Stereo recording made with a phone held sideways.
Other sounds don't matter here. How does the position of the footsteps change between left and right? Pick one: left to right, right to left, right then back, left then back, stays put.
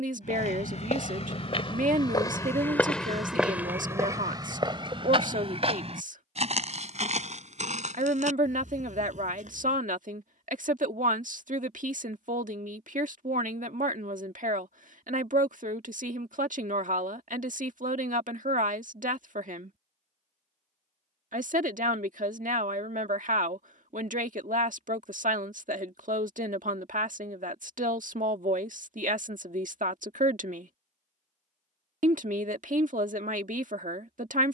left to right.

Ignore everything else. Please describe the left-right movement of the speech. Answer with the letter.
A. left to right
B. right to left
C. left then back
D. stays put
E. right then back
D.